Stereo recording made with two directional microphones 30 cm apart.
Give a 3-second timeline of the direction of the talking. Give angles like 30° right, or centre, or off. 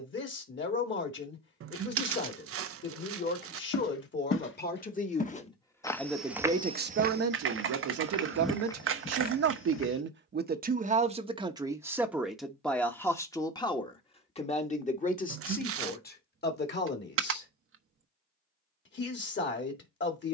40° left, 30° left, 40° right, 30° right, 10° left, 30° left, 30° left.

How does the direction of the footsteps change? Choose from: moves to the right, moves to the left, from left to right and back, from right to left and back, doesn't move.
from left to right and back.